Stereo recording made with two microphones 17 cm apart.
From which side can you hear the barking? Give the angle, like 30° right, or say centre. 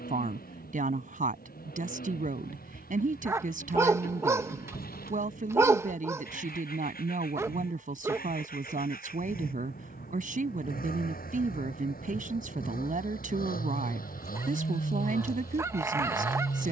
20° right.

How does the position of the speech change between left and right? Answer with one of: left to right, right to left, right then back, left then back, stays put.
stays put.